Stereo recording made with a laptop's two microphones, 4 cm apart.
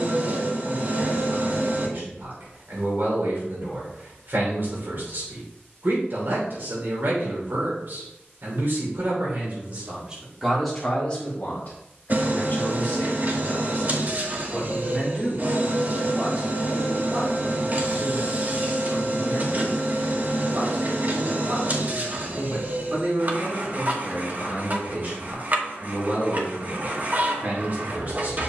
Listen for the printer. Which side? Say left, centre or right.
right.